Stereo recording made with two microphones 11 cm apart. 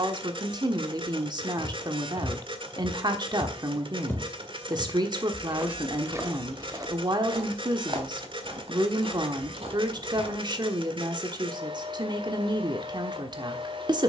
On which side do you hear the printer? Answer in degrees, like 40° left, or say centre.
50° right.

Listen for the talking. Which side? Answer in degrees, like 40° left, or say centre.
40° right.